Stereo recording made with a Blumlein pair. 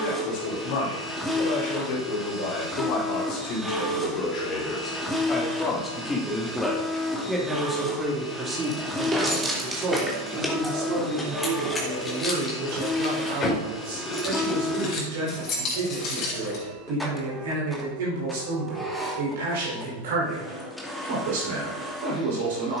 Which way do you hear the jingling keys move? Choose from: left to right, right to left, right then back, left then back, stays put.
right to left.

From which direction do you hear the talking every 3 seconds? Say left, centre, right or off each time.
left, left, centre, right, right, right, right, right.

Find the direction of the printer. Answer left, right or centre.
centre.